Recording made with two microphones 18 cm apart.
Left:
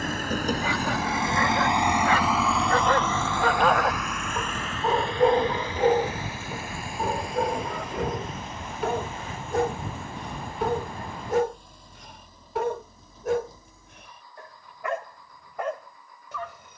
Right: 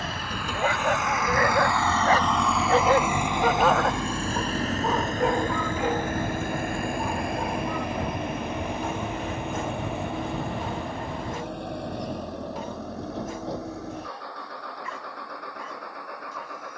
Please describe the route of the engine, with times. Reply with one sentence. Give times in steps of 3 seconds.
You can hear the engine on the left from 0 s and on the right from 3 s.